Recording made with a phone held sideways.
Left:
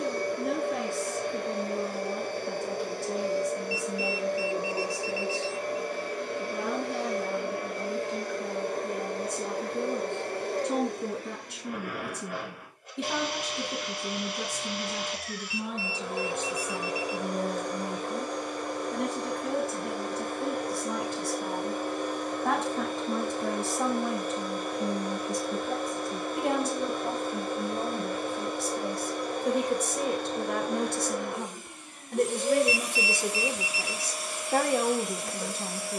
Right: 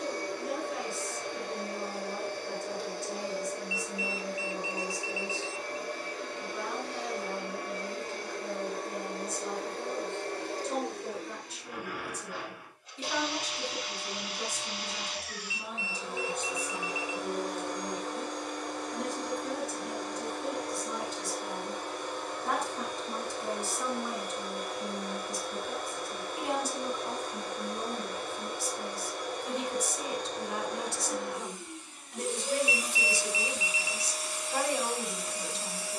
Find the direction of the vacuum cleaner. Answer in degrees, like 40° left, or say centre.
60° left.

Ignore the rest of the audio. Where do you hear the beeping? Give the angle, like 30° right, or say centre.
30° left.